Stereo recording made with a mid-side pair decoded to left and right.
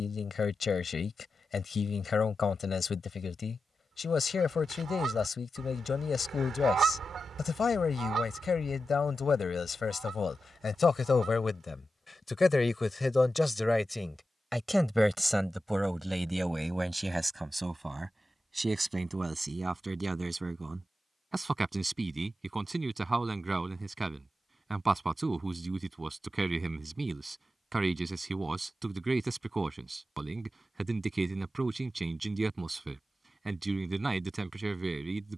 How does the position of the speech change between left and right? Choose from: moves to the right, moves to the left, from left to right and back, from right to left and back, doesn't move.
moves to the right.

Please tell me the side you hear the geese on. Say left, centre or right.
right.